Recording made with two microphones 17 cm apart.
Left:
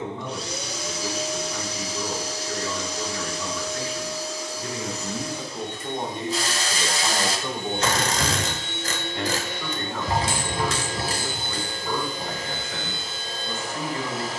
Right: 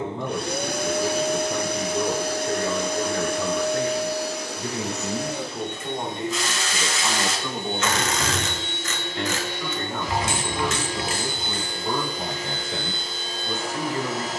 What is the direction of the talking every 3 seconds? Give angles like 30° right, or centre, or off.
40° right, 20° right, 10° left, 10° right, 30° right.